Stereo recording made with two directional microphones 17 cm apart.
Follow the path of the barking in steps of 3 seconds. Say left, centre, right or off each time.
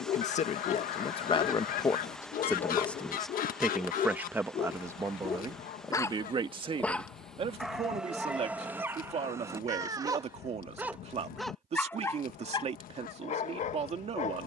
left, left, centre, centre, left.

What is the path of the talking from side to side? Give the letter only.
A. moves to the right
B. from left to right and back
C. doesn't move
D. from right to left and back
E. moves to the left
A.